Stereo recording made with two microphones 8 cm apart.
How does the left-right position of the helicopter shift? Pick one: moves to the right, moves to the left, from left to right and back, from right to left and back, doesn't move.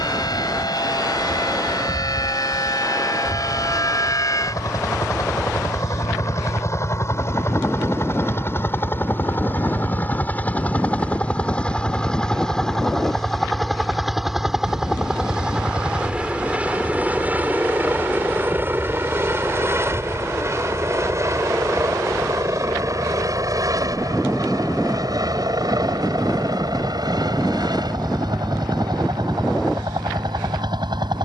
moves to the right.